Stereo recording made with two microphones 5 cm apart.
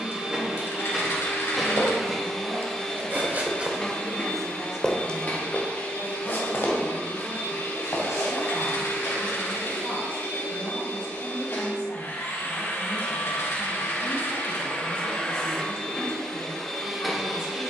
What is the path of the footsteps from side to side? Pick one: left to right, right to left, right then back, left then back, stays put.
right to left.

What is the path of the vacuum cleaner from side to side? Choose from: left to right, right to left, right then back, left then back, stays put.
left then back.